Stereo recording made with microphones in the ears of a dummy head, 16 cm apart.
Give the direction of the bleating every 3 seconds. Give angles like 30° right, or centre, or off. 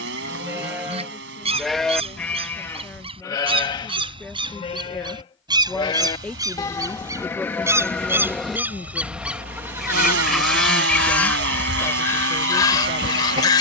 centre, 30° left, 10° left, 20° right, 40° right.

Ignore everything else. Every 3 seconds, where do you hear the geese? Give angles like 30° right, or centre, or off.
40° right, 30° right, 20° right, centre, 20° left.